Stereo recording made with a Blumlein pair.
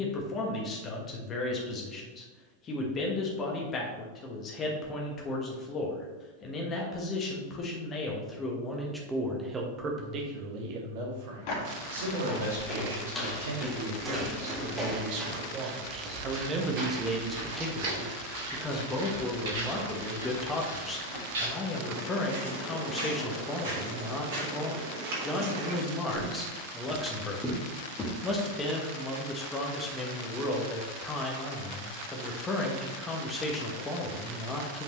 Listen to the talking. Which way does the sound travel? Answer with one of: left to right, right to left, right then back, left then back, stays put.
right then back.